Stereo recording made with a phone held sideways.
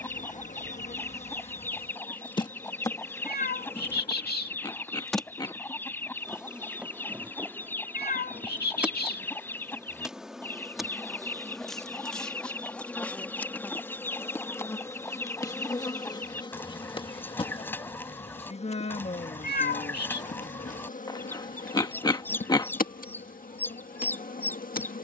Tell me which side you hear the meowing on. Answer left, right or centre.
left.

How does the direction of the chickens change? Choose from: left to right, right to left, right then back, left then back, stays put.
stays put.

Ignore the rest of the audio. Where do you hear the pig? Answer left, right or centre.
left.